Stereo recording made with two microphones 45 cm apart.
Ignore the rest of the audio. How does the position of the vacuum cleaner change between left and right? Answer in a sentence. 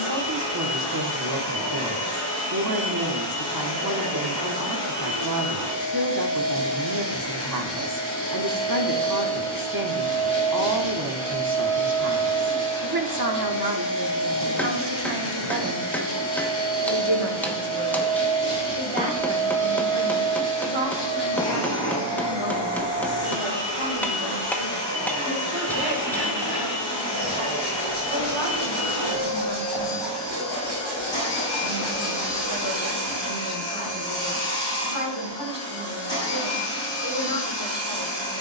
In this clip you hear the vacuum cleaner stay in one place.